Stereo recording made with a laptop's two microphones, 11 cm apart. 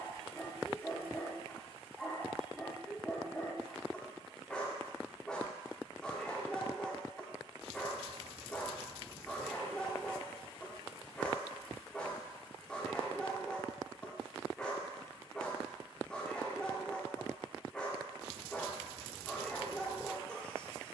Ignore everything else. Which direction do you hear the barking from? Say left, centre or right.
centre.